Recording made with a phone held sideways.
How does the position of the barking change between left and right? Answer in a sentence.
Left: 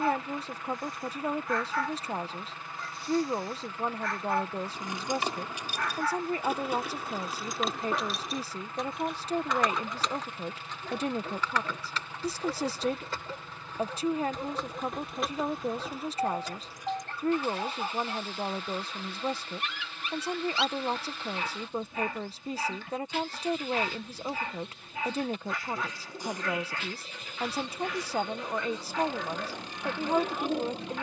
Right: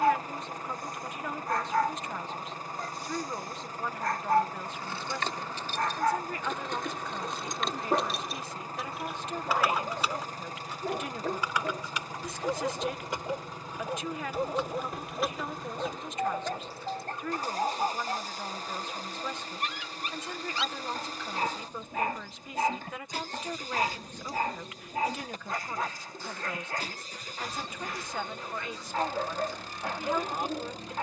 In this clip you hear the barking stay put.